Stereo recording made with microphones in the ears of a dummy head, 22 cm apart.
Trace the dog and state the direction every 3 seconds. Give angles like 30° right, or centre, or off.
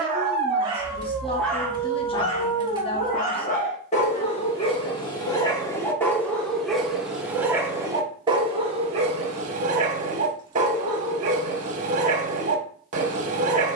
centre, 20° left, 10° right, 30° right, 30° right.